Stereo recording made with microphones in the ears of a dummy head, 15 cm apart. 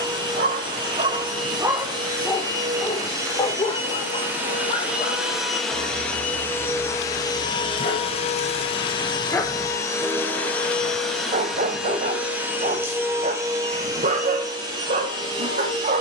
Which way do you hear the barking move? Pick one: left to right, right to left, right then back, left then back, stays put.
left then back.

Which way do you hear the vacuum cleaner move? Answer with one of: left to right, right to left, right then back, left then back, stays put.
left then back.